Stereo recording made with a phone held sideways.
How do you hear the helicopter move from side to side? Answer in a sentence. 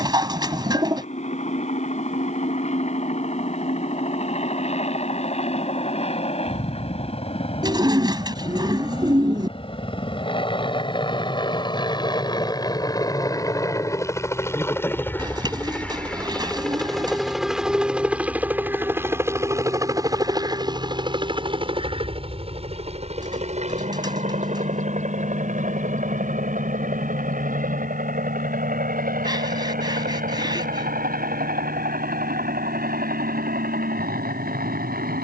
You can hear the helicopter travel towards the right.